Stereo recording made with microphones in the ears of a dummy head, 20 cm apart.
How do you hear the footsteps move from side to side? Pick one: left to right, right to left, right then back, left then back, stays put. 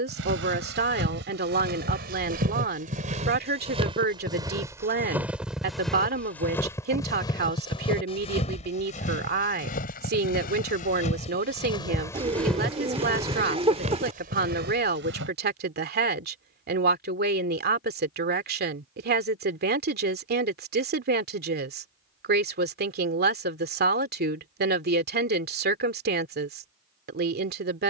left then back.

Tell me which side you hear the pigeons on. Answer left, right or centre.
right.